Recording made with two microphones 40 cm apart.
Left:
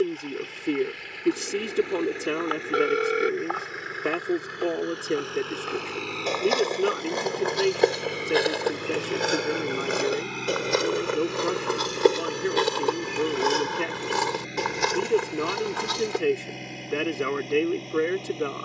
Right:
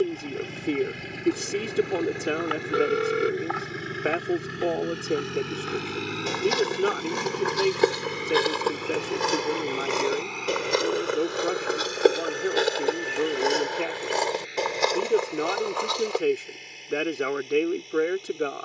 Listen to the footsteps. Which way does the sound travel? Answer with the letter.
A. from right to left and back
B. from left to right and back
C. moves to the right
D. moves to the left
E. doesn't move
D.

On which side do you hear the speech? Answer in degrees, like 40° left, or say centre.
10° left.